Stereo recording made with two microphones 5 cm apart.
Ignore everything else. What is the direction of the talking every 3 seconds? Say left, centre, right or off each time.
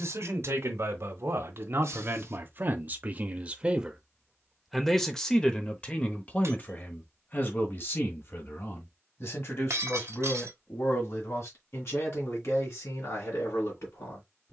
right, centre, left, left, left.